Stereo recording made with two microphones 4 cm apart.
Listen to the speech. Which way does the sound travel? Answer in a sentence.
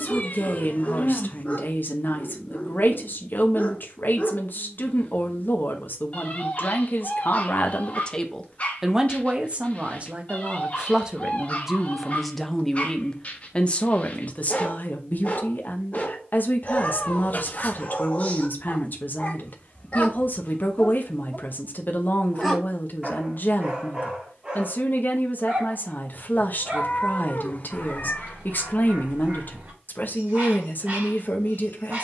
You can hear the speech move from left to right and back again.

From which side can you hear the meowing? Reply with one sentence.
You can hear the meowing on the left.